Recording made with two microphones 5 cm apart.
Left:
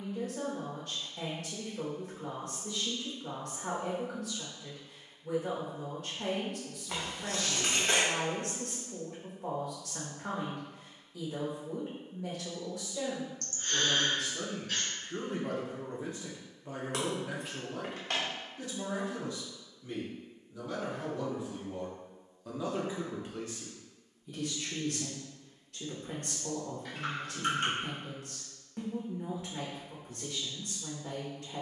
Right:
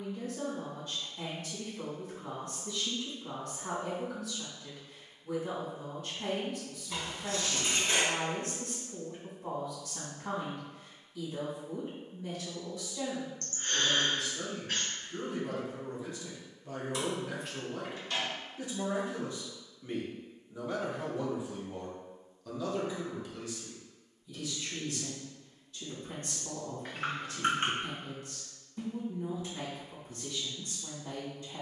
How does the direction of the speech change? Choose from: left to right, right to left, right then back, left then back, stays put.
right then back.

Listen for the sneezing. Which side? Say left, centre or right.
right.